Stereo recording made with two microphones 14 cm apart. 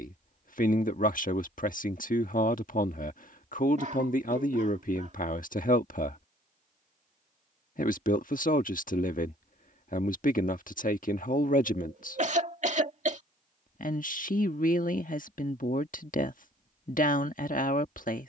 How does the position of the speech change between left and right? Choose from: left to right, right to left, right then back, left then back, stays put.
stays put.